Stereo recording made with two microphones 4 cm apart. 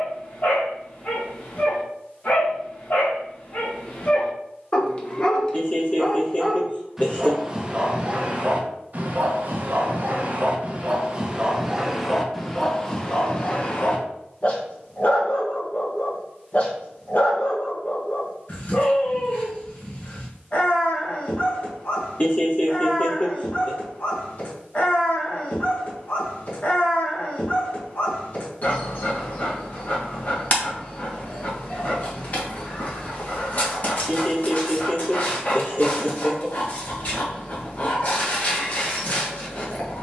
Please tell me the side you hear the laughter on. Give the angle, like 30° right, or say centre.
40° left.